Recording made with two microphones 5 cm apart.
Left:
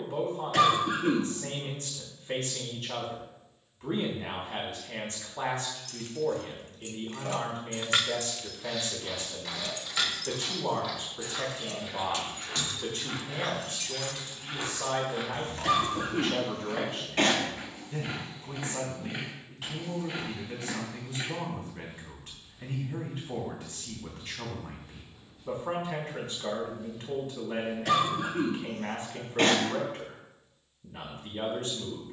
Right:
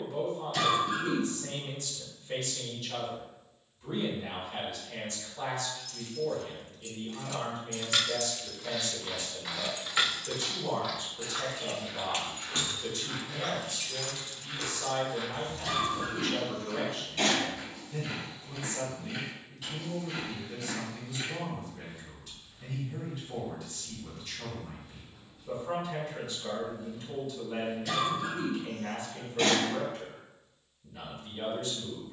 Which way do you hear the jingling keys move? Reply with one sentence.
In this clip you hear the jingling keys go right and come back.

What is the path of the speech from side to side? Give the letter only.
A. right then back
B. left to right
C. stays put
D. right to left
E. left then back
C.